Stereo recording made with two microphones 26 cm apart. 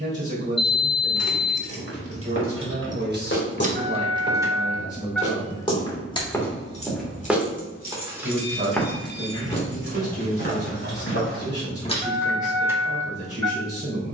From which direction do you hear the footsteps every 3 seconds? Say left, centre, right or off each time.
left, left, centre, left, off.